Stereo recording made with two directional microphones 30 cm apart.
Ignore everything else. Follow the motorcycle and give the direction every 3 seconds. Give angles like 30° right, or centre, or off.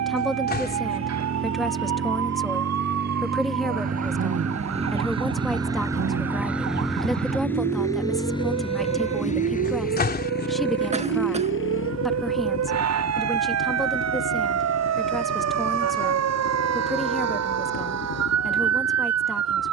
40° right, 20° right, 10° left, 30° left, 50° left, 60° left, 70° left.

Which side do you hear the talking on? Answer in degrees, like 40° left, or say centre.
centre.